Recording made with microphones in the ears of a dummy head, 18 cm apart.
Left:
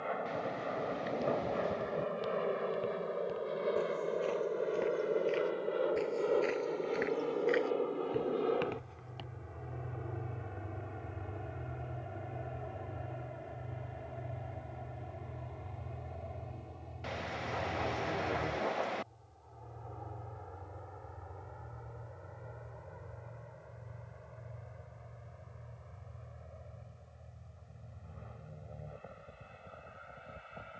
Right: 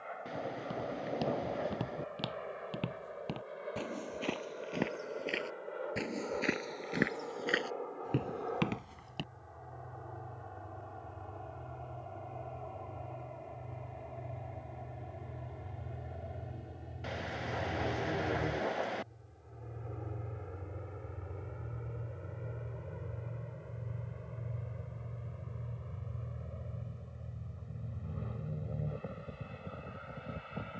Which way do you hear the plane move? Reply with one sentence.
In this clip you hear the plane move from left to right.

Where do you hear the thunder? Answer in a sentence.
You can hear the thunder in the centre.